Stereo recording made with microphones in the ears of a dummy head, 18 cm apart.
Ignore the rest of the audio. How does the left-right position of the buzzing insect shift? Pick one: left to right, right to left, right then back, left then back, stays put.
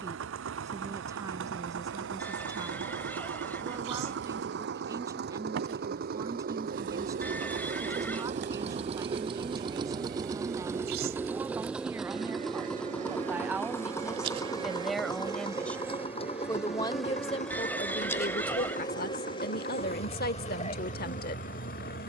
right to left.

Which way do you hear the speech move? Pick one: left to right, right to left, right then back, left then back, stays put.
right to left.